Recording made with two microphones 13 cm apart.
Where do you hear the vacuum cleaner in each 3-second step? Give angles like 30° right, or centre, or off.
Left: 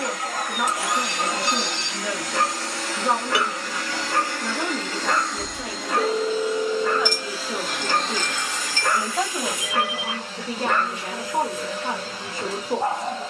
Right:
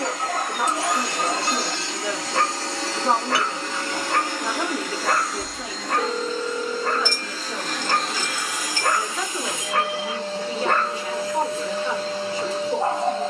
30° right, 10° right, centre, 30° right, 30° right.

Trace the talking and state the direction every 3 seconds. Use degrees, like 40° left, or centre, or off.
20° right, 20° right, 10° left, 40° left, 50° left.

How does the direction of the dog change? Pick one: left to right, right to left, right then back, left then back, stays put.
stays put.